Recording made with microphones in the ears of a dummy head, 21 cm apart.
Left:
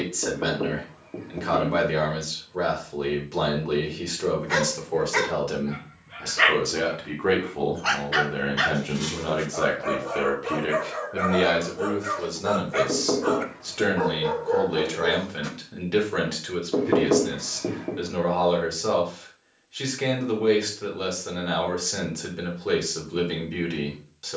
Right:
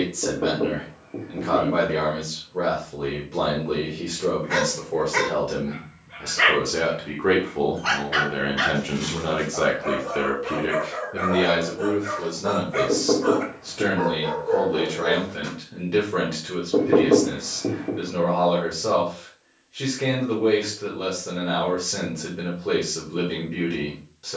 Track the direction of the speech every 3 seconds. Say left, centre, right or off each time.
left, left, centre, centre, left, left, left, left.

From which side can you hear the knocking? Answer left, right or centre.
left.